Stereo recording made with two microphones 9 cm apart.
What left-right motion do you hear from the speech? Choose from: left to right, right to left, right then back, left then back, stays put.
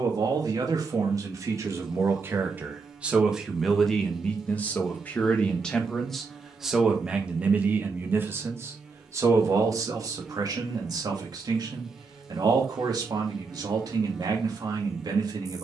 left then back.